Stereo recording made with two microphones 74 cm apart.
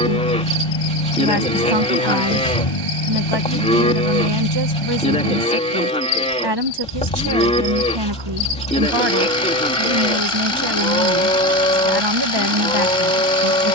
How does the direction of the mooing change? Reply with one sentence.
In this clip you hear the mooing stay put.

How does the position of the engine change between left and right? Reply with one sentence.
In this clip you hear the engine stay in one place.